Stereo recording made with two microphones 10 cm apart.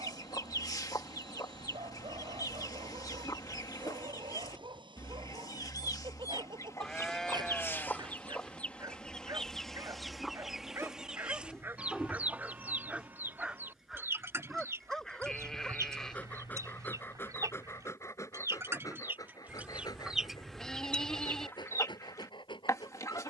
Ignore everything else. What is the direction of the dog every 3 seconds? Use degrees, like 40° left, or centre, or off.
60° right, 50° right, 40° right, 30° right, 10° right, 20° left, 40° left, 50° left.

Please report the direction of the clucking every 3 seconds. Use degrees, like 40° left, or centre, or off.
40° left, 40° left, 20° left, centre, 20° right, 30° right, 10° right, 30° left.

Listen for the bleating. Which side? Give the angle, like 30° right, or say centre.
10° left.